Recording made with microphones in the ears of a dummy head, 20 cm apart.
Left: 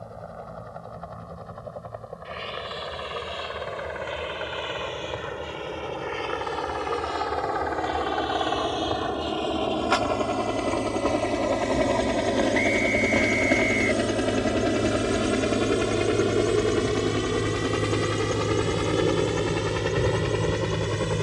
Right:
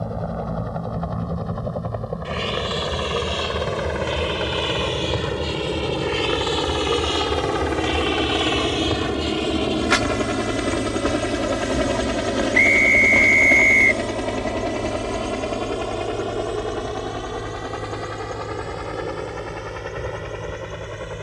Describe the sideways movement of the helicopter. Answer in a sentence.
In this clip you hear the helicopter travel towards the left.